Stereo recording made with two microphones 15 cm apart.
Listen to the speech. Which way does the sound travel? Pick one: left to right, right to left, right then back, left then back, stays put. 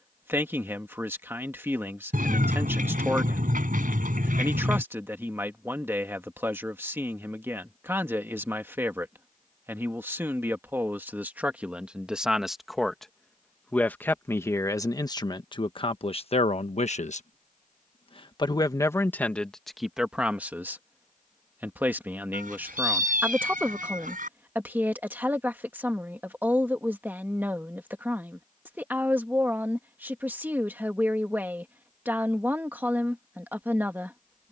left then back.